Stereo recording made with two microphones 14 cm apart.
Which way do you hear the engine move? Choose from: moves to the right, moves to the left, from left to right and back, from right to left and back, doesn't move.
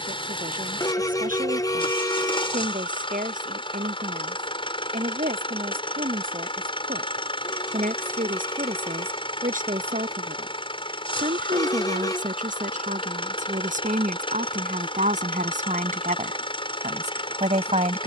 doesn't move.